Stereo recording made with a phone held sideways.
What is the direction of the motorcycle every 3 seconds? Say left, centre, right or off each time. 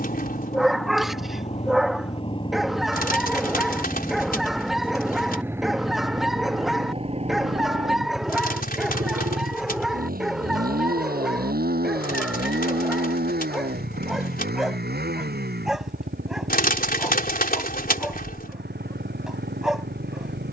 left, centre, right, right, right, right, right.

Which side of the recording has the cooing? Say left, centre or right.
left.